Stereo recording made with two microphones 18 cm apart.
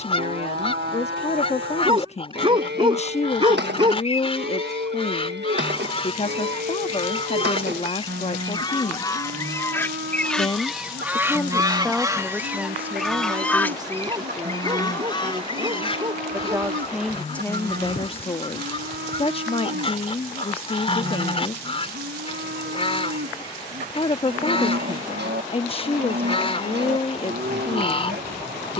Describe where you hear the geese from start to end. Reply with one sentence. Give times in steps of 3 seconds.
In this clip you hear the geese on the left from 0 s, in the centre from 9 s and on the left from 15 s.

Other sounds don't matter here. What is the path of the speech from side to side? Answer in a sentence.
In this clip you hear the speech go right and come back.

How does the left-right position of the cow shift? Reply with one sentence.
You can hear the cow stay in one place.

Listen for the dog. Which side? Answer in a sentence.
In this clip you hear the dog on the right.